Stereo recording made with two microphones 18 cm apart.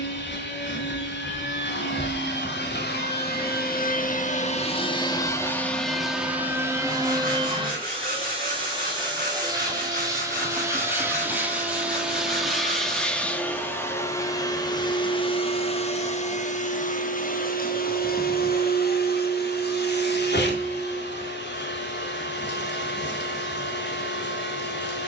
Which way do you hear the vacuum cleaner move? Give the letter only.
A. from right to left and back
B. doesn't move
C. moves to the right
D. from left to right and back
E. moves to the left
D.